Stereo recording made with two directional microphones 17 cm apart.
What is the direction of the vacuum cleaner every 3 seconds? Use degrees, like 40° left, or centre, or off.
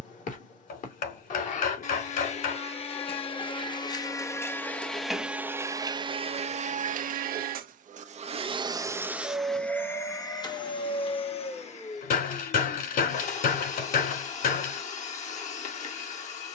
40° left, 10° left, 40° right, 20° left, 40° left, 40° left.